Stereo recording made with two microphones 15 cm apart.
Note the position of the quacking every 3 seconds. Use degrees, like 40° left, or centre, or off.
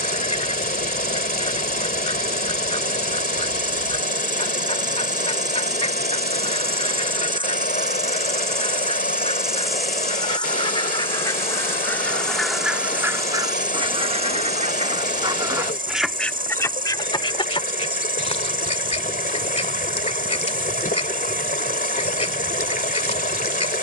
40° left, 40° left, 40° left, 30° left, 20° right, 10° left, 40° left, 40° left.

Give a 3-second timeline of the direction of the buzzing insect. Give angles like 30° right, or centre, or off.
70° right, 60° right, 30° right, 10° left, 20° right, 70° right, 70° right, 70° right.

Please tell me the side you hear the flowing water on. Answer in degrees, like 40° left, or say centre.
70° left.